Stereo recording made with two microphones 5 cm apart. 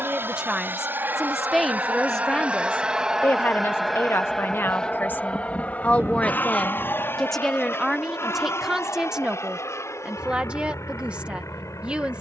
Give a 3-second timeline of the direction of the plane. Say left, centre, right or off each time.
right, centre, left, left.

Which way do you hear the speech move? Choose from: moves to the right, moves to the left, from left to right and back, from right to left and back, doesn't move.
from right to left and back.